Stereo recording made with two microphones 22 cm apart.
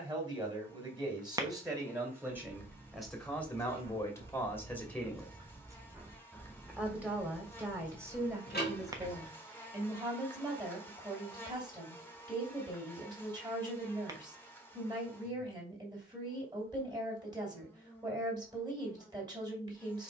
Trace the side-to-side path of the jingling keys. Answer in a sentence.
In this clip you hear the jingling keys move to the left.